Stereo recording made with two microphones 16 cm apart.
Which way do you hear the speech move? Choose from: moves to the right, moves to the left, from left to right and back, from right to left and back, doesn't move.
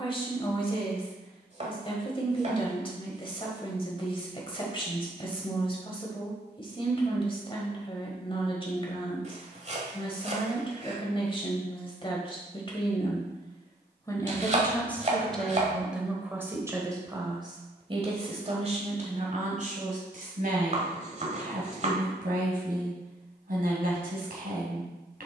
moves to the right.